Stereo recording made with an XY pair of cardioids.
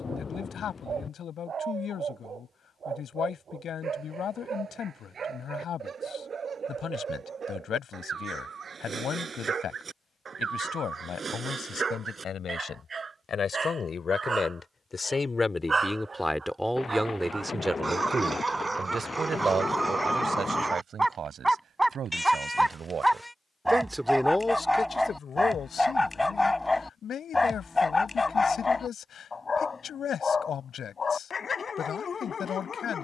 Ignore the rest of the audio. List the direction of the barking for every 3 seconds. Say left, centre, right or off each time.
right, right, right, right, right, right, right, centre, centre, left, left.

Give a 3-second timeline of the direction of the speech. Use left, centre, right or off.
left, left, left, left, left, centre, right, right, left, left, left.